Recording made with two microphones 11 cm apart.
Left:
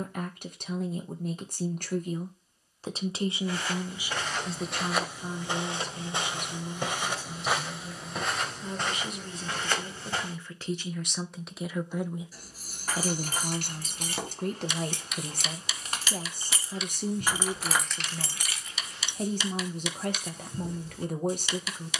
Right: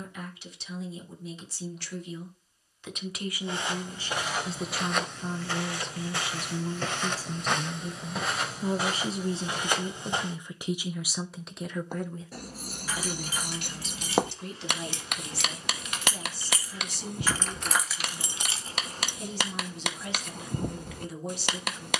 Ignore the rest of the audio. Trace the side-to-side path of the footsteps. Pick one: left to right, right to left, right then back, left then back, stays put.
left then back.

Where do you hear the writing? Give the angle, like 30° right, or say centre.
70° right.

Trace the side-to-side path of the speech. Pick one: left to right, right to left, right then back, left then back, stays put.
right then back.